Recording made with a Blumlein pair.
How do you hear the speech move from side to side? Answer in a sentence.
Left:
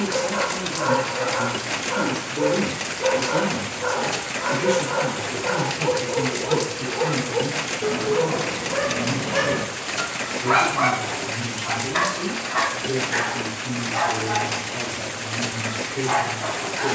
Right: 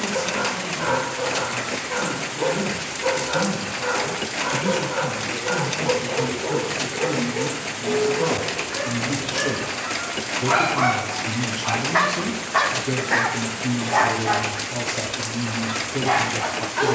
You can hear the speech go from the left side to the right.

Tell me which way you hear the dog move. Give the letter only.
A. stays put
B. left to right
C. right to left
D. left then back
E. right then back
B.